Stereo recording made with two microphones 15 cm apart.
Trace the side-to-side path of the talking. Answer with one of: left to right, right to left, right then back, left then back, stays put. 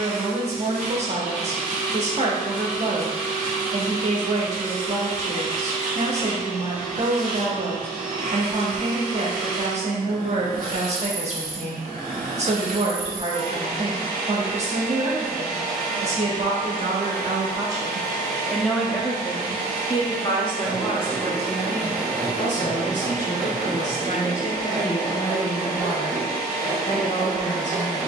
right to left.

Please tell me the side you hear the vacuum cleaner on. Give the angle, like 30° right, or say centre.
60° right.